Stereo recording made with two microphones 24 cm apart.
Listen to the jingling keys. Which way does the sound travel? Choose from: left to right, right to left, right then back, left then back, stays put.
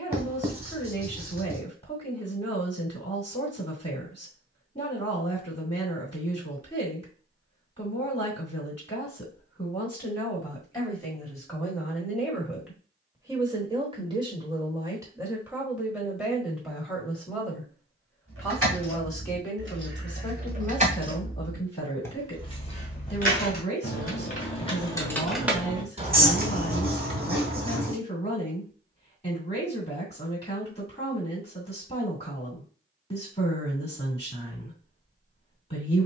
left then back.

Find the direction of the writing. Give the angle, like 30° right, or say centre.
40° right.